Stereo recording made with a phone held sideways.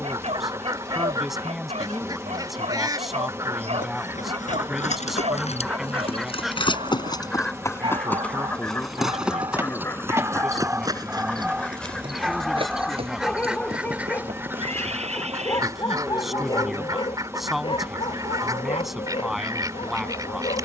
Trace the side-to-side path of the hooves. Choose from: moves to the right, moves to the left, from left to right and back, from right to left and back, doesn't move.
moves to the right.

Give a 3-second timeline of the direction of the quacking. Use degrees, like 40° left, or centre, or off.
30° right, 10° right, 10° left, 10° left, 10° right, 30° right, 30° right.